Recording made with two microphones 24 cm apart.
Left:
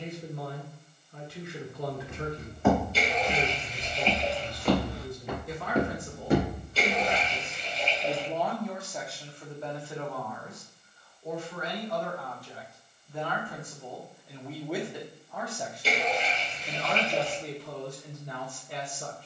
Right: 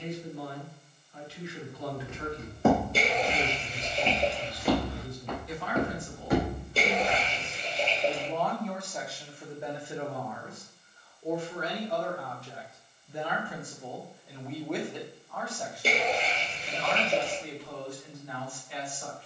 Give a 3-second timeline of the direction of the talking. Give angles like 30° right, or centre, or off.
50° left, 50° left, 30° left, 20° right, 10° right, 30° left, 50° left.